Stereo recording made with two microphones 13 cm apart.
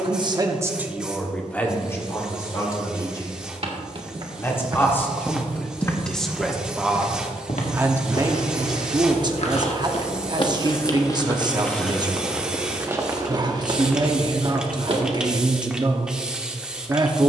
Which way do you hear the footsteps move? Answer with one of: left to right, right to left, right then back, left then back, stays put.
left then back.